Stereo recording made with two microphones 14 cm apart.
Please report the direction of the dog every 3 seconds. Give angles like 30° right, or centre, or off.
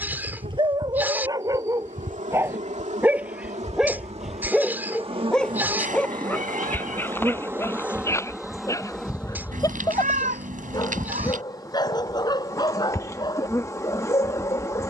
20° right, centre, 20° left, 30° left, 30° left.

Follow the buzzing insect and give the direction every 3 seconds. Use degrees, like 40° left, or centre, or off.
60° right, 40° right, 10° right, 20° left, 20° left.